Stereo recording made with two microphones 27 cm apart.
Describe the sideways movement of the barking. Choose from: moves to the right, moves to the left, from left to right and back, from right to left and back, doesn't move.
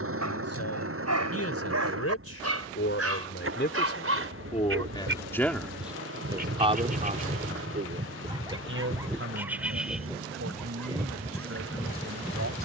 moves to the left.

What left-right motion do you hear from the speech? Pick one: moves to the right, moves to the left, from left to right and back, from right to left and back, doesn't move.
moves to the right.